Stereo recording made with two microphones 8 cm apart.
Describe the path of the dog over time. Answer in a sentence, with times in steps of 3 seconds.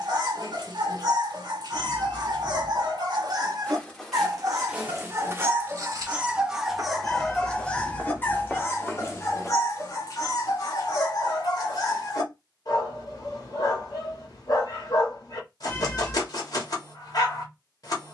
In this clip you hear the dog on the right from 0 s, in the centre from 6 s and on the left from 9 s.